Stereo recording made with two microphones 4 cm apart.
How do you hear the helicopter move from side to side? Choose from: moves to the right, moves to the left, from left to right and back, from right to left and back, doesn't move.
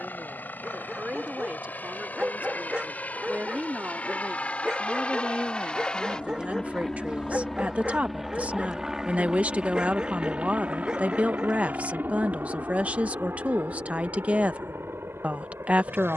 moves to the right.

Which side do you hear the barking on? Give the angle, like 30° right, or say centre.
20° right.